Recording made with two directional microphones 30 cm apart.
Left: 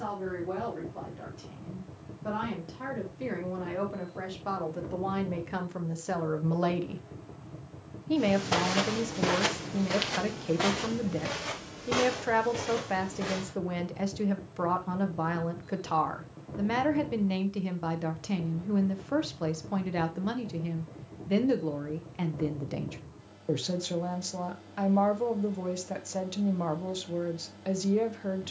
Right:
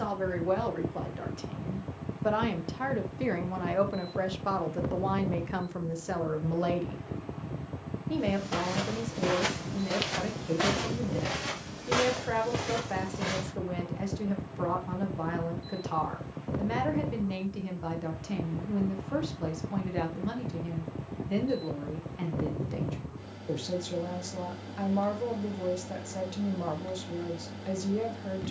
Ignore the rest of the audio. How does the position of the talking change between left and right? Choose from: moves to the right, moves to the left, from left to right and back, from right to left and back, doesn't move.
moves to the left.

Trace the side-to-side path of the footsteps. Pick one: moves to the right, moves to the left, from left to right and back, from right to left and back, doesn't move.
moves to the right.